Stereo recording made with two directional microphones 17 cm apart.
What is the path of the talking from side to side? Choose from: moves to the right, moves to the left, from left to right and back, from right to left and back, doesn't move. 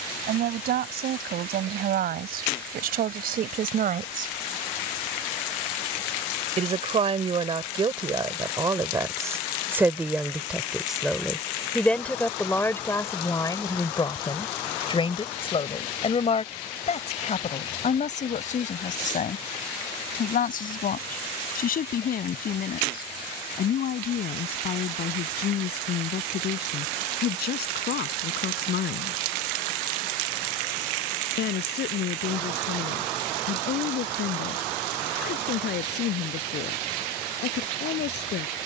moves to the left.